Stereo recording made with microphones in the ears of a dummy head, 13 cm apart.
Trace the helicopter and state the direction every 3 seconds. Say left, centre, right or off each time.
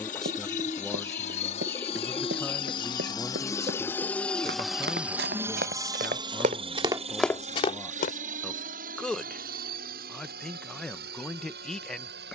left, centre, right, right.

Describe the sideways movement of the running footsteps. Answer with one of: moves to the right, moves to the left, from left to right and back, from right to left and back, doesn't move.
moves to the left.